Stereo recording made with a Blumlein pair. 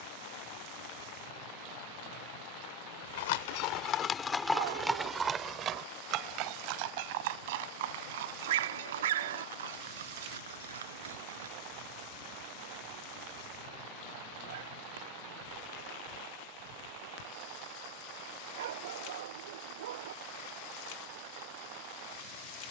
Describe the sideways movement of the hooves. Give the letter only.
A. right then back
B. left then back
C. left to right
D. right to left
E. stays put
C.